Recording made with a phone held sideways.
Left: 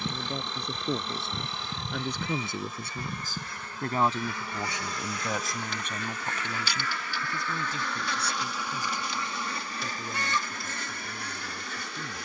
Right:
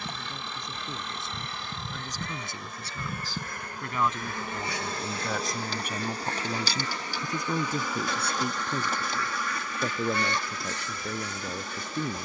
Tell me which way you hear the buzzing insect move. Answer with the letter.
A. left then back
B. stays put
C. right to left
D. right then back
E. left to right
E.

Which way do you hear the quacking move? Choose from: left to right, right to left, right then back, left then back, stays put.
right to left.